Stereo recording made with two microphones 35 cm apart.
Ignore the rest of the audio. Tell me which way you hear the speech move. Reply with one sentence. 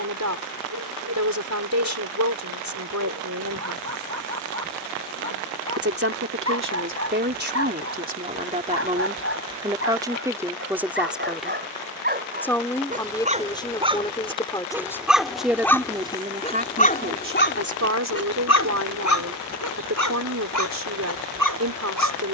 In this clip you hear the speech go left and come back.